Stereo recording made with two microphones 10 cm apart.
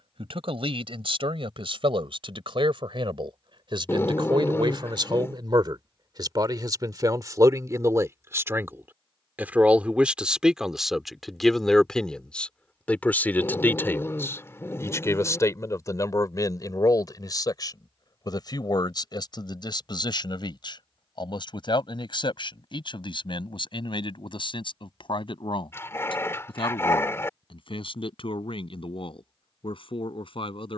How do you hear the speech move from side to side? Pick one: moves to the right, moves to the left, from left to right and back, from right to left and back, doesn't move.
moves to the left.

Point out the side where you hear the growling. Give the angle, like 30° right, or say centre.
30° left.